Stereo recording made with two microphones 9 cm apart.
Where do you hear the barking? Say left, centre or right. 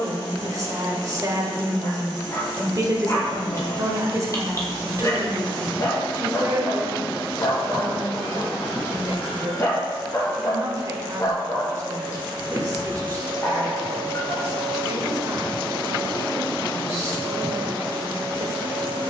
left.